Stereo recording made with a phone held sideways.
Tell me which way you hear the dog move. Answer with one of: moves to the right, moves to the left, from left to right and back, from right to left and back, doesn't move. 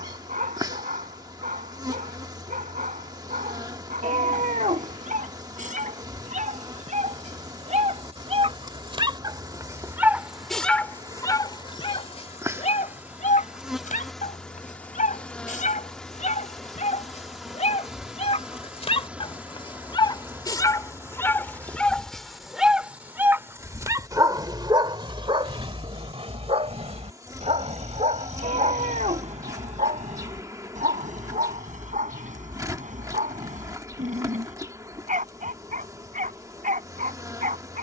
from right to left and back.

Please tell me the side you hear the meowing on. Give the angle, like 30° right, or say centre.
60° right.